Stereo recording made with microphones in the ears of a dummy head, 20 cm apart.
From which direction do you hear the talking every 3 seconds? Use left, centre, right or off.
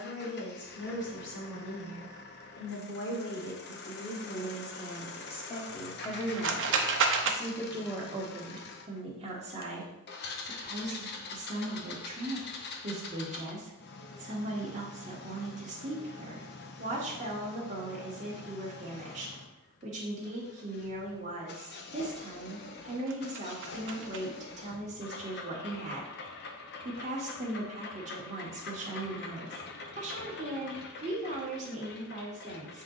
left, left, centre, right, right, right, right, right, right, right, right.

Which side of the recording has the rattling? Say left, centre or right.
right.